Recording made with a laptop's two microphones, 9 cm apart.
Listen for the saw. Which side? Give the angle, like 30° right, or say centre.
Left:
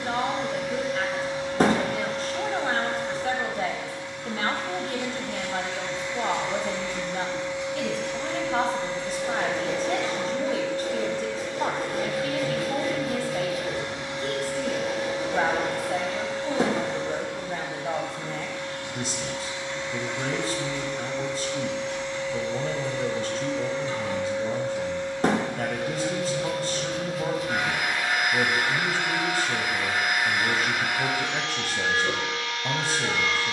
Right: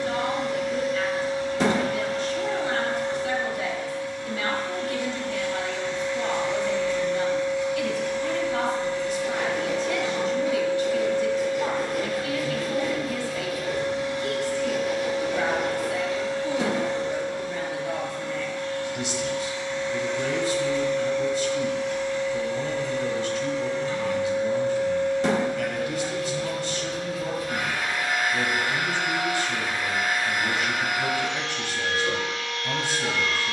40° left.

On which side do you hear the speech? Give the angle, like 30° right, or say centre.
40° left.